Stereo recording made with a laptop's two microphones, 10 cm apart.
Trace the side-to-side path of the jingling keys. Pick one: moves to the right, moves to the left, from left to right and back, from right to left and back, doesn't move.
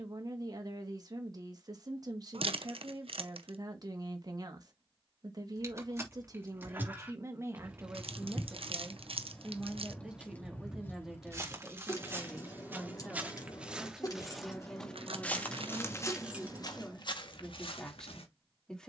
from right to left and back.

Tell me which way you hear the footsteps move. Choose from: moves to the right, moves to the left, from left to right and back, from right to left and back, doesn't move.
moves to the left.